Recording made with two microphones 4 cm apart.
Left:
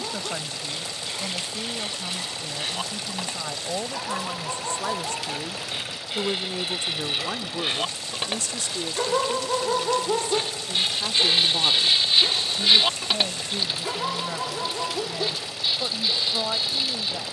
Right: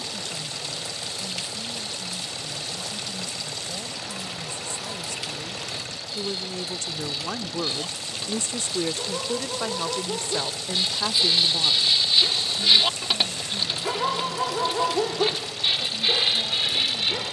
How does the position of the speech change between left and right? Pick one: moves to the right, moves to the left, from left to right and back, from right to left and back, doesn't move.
from left to right and back.